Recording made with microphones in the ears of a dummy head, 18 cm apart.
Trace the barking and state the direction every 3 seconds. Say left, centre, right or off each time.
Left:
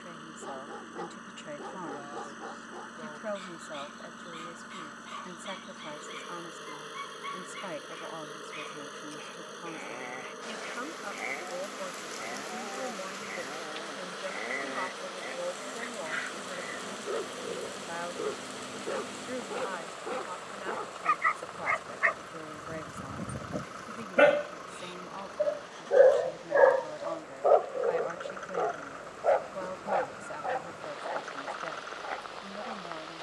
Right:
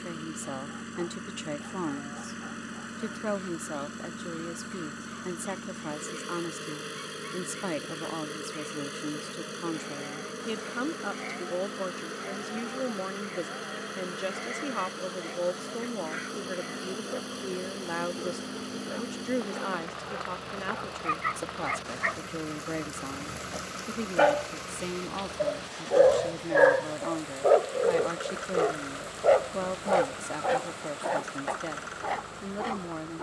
left, left, left, left, left, left, left, left, centre, right, right.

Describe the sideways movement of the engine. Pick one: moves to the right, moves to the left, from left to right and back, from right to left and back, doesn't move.
doesn't move.